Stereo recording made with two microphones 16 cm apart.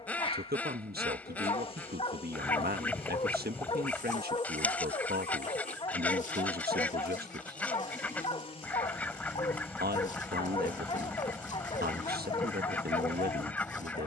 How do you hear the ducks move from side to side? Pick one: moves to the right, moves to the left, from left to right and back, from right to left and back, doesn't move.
doesn't move.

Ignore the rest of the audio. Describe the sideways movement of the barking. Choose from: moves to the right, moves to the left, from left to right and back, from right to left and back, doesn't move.
doesn't move.